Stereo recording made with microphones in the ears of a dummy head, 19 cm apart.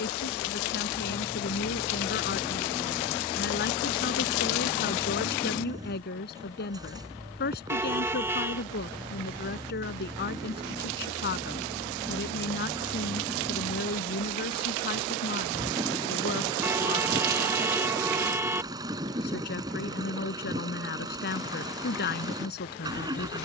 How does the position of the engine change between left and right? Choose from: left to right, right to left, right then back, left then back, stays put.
stays put.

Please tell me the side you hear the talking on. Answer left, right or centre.
left.